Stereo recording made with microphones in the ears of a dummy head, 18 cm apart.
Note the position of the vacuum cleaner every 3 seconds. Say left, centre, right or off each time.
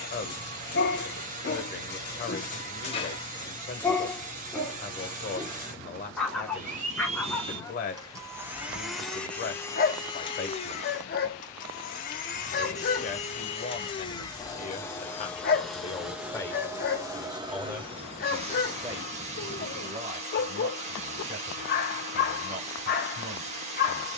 right, right, right, left, left, centre, right, right.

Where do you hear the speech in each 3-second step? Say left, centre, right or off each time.
left, left, left, left, left, centre, right, right.